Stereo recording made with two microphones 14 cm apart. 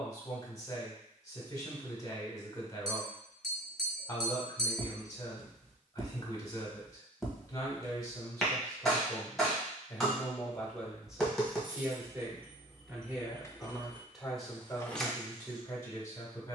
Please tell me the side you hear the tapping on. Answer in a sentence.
You can hear the tapping in the centre.